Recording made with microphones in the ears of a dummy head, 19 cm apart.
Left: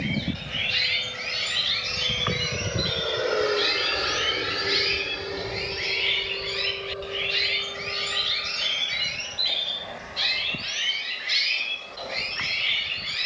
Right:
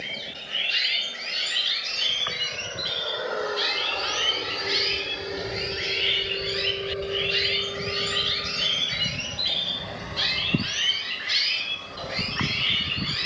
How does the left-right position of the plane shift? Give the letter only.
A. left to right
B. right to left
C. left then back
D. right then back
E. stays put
A.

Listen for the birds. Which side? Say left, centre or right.
centre.